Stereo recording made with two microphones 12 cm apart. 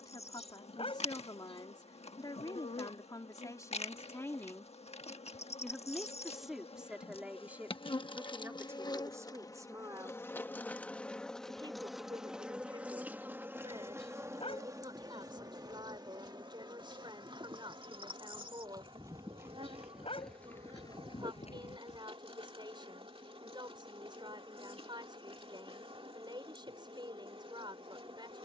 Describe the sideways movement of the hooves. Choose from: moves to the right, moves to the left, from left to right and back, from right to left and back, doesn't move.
moves to the left.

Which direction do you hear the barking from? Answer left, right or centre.
left.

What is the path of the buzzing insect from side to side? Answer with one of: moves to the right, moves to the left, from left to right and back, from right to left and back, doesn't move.
moves to the right.